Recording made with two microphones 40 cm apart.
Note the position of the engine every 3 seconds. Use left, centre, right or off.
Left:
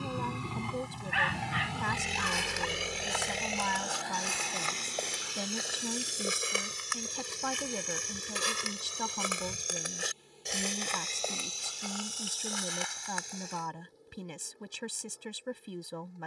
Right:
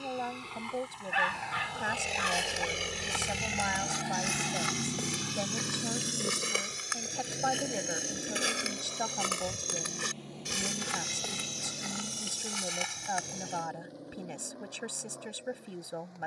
left, right, right, right, right, right.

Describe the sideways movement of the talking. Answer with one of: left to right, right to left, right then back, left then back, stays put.
stays put.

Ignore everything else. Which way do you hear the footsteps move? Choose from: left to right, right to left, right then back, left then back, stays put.
left then back.